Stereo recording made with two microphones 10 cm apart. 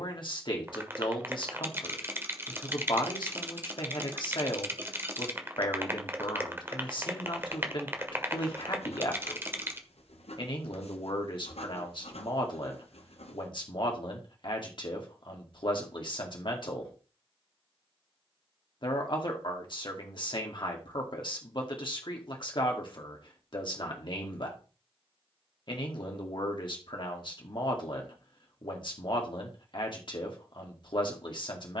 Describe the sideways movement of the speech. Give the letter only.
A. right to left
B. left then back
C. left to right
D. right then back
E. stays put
E.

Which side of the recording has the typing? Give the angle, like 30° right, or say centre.
20° right.